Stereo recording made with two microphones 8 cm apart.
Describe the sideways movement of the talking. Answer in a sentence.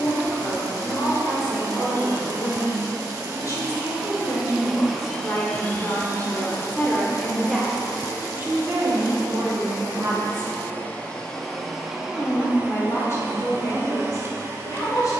You can hear the talking move from left to right and back again.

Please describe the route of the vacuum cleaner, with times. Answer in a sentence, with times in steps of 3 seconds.
In this clip you hear the vacuum cleaner on the right from 0 s, in the centre from 3 s, on the left from 6 s and on the right from 12 s.